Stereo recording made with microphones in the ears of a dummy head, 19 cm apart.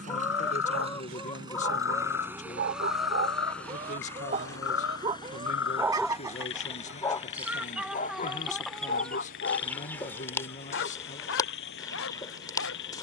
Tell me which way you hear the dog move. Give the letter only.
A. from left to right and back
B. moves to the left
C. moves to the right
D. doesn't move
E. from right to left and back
B.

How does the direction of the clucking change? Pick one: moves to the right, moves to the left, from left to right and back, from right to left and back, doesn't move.
from left to right and back.